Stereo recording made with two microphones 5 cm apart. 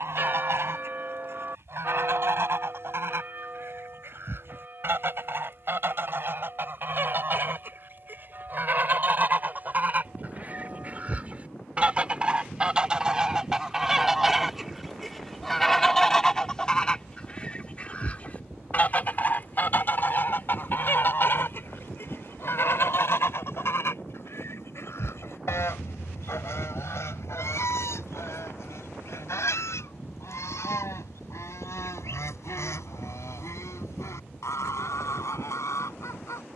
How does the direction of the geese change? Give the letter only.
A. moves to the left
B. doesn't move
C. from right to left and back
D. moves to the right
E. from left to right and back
A.